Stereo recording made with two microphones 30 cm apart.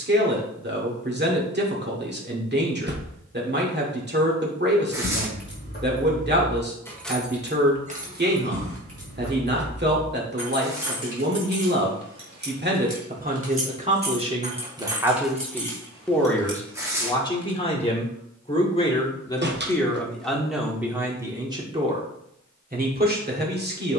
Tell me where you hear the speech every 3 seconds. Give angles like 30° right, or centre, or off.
30° right, 30° right, 30° right, 30° right, 20° right, 10° left, 10° left, 20° right.